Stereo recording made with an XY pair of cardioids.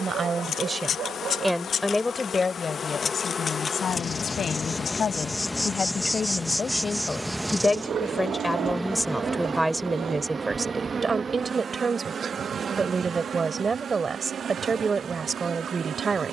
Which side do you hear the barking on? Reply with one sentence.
You can hear the barking on the right.